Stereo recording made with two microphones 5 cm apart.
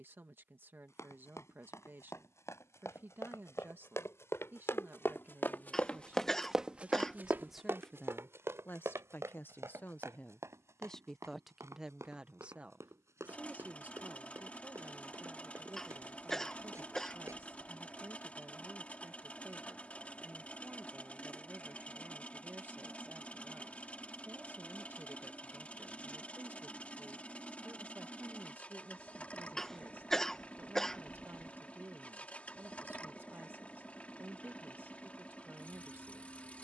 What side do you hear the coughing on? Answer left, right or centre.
centre.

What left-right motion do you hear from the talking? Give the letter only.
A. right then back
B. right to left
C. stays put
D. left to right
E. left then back
E.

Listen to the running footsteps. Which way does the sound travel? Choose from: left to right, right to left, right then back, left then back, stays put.
left to right.